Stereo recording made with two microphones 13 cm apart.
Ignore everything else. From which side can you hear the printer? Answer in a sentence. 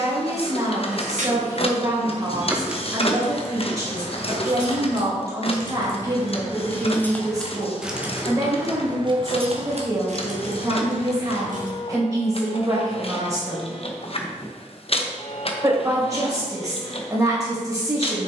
In this clip you hear the printer on the left.